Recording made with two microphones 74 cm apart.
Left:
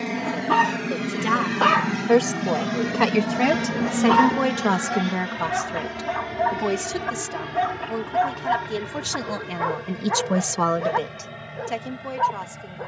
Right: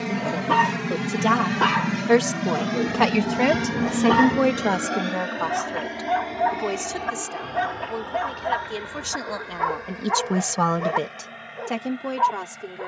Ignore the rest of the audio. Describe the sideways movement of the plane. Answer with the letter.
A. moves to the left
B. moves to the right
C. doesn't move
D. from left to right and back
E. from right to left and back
A.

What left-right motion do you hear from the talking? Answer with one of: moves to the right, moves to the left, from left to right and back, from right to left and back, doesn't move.
from right to left and back.